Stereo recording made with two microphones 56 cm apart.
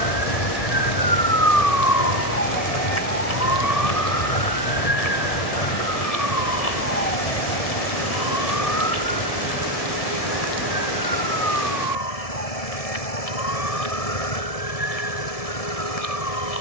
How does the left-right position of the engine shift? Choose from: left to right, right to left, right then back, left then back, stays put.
stays put.